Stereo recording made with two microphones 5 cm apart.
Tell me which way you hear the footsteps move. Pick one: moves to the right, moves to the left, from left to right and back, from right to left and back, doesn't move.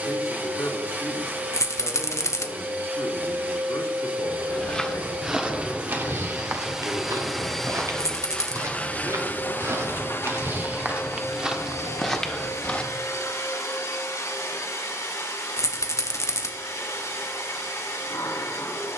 from left to right and back.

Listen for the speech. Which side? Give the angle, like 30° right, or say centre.
80° left.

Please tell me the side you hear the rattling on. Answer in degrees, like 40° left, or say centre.
70° left.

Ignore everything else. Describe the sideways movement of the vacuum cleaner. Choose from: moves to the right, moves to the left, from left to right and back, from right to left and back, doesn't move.
moves to the left.